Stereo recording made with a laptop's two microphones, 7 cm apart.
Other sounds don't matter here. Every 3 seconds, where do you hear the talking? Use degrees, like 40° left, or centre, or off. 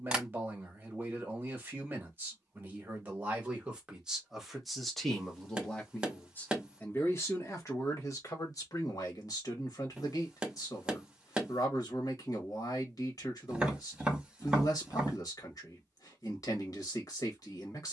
30° right, centre, 40° left, 50° left, 50° left, 50° left.